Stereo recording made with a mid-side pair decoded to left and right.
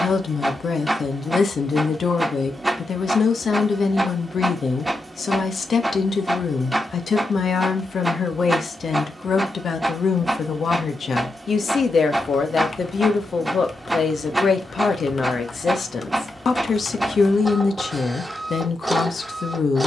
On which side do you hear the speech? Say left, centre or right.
left.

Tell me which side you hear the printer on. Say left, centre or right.
centre.